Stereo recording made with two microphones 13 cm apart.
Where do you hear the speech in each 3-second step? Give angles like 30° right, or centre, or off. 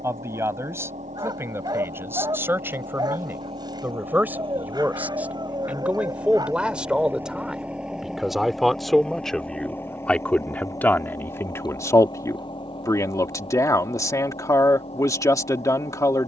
20° right, 10° right, centre, 10° left, 20° left, 20° left.